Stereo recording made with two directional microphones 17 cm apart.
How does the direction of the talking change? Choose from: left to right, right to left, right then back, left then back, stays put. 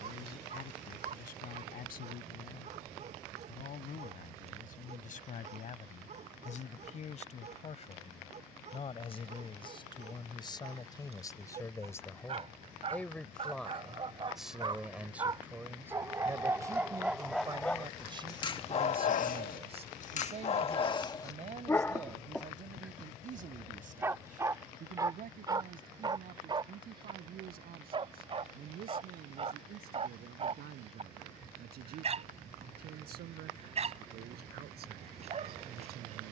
left to right.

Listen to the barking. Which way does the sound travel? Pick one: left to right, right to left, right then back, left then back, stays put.
left then back.